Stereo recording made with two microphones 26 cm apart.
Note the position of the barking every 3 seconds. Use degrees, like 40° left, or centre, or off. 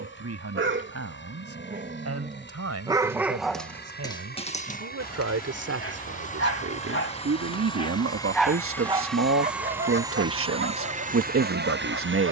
40° right, 20° left, 20° left, 50° right.